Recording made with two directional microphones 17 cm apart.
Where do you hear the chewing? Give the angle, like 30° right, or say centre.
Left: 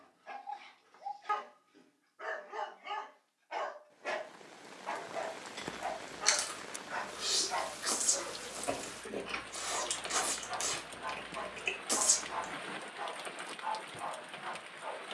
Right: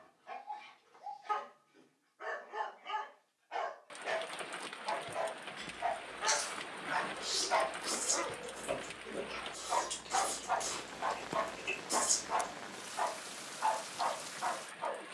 50° left.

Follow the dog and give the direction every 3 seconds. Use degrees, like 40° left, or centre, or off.
30° left, 10° left, 40° right, 60° right, 60° right.